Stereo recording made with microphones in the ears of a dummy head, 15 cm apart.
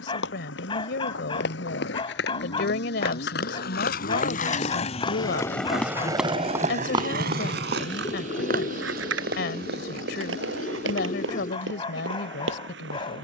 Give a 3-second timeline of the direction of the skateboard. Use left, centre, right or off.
left, left, right, right, off.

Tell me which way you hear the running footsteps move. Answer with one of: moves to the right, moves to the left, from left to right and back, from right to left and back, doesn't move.
moves to the right.